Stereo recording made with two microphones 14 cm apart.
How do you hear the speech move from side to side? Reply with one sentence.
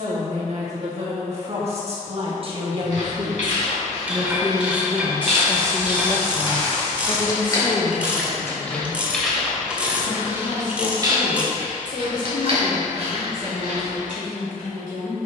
In this clip you hear the speech move from right to left.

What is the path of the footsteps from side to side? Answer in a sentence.
In this clip you hear the footsteps move from left to right.